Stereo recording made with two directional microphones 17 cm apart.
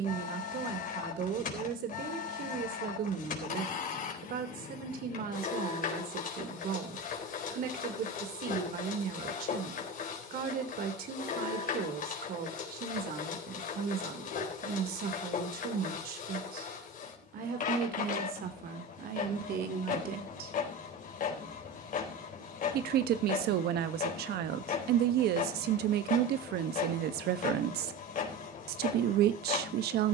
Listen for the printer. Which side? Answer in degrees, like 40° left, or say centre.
50° left.